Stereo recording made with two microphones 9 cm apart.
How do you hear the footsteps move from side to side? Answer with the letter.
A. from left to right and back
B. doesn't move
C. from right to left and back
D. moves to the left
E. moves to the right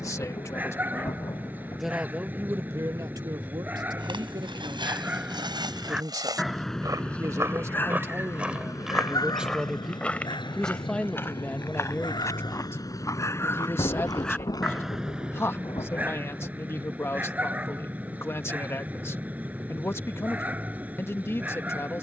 D.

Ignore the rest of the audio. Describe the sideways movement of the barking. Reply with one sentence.
You can hear the barking move from right to left and back again.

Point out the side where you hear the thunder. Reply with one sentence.
In this clip you hear the thunder on the left.